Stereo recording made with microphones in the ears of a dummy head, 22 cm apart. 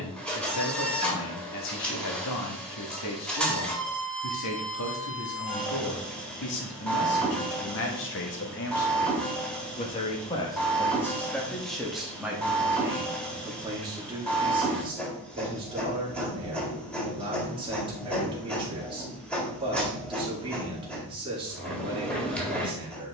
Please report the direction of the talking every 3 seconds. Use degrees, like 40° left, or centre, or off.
80° left, 80° left, 60° left, 10° left, 10° right, 20° right, 20° right, 20° right.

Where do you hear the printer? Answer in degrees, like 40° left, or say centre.
centre.